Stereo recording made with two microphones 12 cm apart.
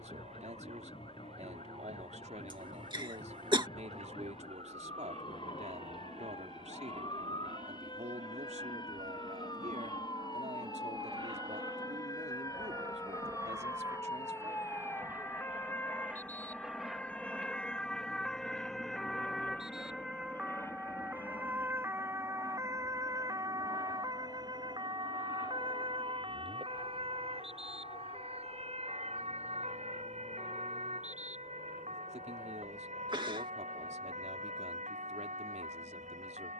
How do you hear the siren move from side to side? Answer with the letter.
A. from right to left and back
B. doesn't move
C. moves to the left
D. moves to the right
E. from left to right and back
D.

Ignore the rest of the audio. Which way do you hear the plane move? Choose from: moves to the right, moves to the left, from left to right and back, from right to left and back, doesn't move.
moves to the left.